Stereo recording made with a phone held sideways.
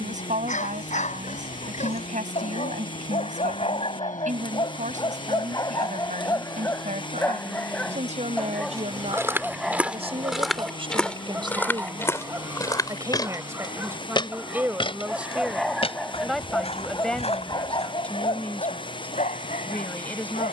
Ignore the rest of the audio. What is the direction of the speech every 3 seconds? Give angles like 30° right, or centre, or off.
70° right, 70° right, 60° right, 40° right, 20° right, centre, 10° left.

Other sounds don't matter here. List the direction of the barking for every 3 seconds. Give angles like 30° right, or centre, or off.
60° left, 40° left, 10° left, 10° right, 20° right, 20° left, 60° left.